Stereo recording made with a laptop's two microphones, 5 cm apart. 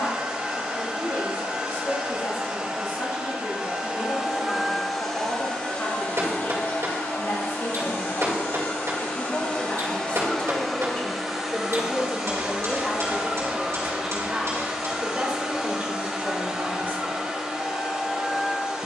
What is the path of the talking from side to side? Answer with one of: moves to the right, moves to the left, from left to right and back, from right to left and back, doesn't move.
moves to the right.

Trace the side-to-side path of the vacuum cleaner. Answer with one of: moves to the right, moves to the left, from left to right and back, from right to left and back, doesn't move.
from right to left and back.